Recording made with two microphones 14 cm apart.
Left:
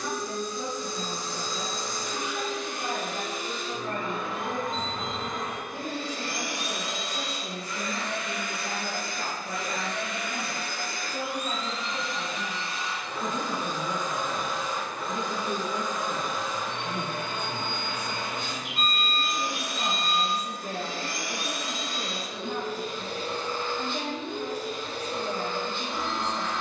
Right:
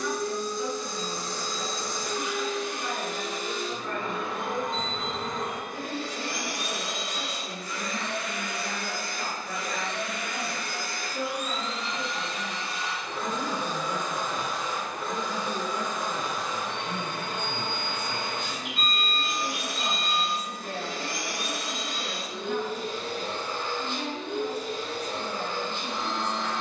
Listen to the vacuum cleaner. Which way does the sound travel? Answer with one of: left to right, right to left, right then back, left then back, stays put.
stays put.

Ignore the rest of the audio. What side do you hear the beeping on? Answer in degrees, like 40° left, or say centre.
50° left.